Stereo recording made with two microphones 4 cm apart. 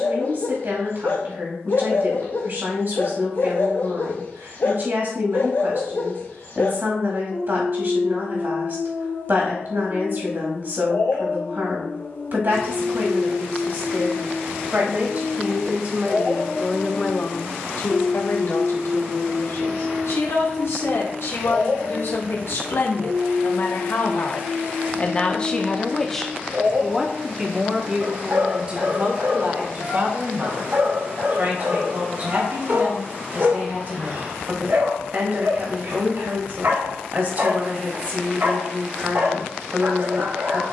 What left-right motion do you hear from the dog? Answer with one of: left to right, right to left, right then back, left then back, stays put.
left to right.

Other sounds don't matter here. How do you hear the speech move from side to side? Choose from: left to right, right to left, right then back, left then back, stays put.
left then back.